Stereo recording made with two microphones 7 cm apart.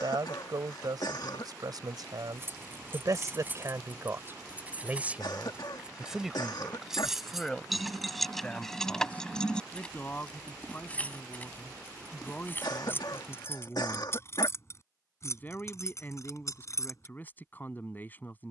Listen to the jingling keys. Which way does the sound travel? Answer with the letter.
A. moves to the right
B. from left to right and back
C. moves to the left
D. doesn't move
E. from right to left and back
C.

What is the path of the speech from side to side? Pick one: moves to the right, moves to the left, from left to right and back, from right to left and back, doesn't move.
moves to the left.